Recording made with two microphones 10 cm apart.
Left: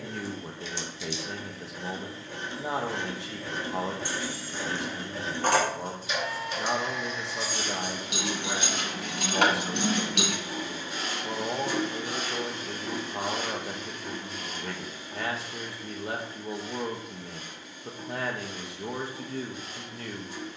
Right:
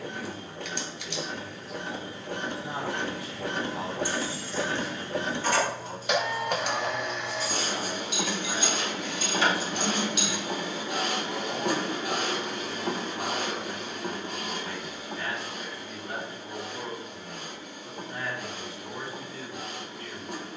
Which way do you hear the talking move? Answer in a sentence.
You can hear the talking stay in one place.